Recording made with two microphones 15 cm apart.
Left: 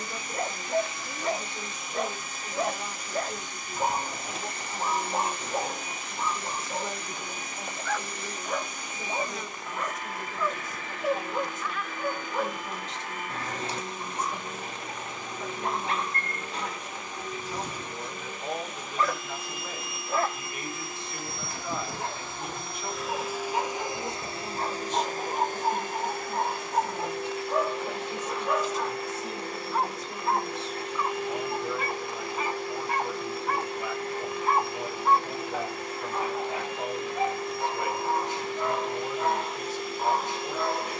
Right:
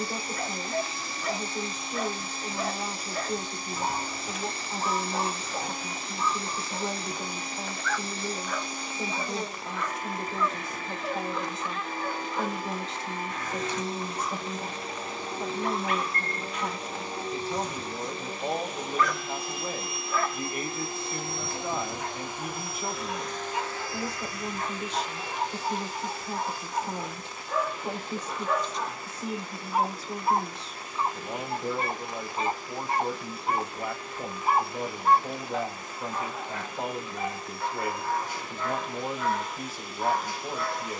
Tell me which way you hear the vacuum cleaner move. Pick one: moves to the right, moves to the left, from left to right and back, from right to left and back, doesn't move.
moves to the left.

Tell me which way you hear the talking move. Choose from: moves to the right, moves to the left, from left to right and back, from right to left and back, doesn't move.
doesn't move.